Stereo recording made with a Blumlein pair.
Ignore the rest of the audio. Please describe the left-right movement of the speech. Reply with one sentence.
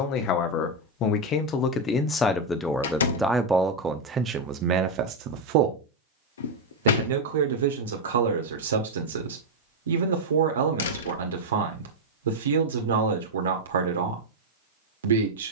In this clip you hear the speech move to the right.